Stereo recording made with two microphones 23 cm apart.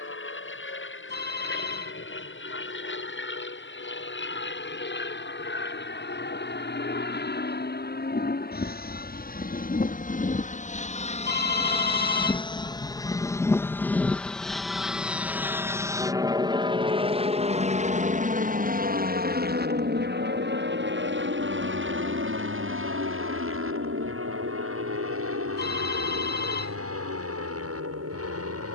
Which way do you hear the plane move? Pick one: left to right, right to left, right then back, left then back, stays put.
left to right.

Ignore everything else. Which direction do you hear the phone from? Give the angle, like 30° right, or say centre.
50° left.